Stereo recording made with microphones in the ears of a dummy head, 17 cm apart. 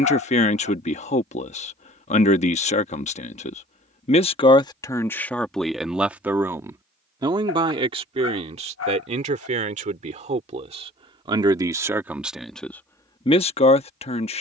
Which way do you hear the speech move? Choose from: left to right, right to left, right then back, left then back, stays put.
right then back.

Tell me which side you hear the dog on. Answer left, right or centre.
left.